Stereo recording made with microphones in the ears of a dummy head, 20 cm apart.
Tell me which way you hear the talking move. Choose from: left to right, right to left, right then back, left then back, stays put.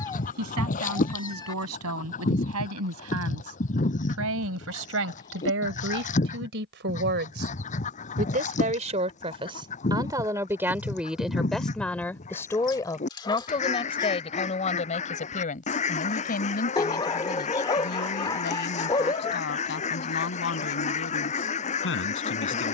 right to left.